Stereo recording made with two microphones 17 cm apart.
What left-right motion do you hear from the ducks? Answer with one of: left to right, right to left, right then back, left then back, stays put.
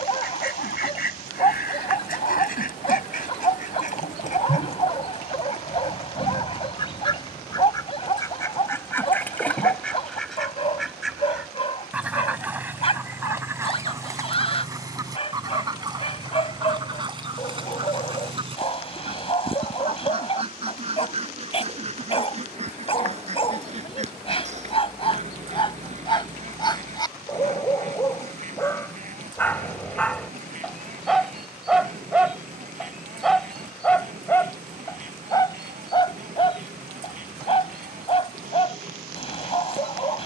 left to right.